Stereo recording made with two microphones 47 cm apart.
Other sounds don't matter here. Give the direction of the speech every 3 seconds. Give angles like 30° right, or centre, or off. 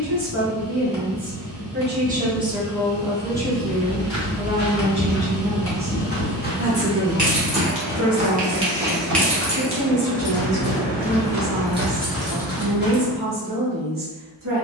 20° right, 10° right, 30° right, 40° right, 40° right.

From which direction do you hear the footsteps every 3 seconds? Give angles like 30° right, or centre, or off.
off, 60° left, centre, 30° right, 10° left.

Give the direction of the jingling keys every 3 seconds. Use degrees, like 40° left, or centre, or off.
off, off, 20° right, 10° left, 30° right.